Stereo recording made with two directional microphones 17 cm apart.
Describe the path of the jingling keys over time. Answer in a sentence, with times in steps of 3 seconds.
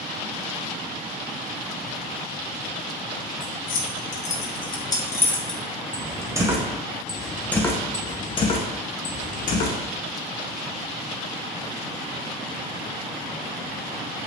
In this clip you hear the jingling keys not at all from 0 s, on the left from 3 s, in the centre from 6 s, on the left from 9 s and not at all from 12 s.